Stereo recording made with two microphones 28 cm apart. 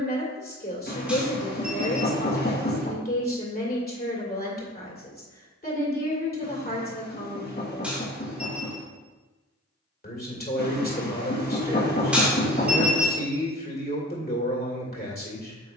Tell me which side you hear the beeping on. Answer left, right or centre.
centre.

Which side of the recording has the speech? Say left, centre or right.
left.